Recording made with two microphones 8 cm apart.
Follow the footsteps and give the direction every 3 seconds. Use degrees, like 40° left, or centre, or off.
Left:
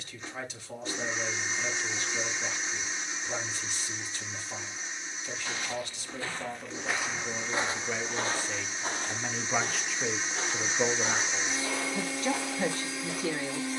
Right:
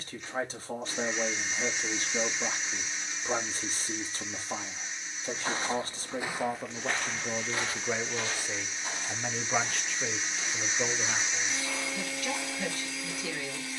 off, 30° right, 20° left, 50° left, 60° left.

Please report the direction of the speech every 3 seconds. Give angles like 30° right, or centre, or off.
40° right, 40° right, 20° right, 10° left, 30° left.